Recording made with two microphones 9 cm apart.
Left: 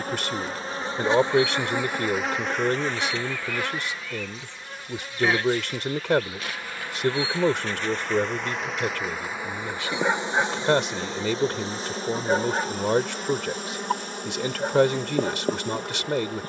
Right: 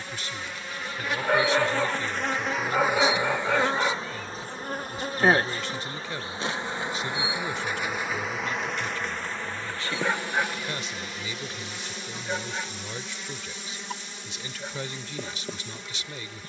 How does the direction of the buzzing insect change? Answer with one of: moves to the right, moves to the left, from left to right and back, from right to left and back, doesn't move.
from left to right and back.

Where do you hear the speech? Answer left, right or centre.
left.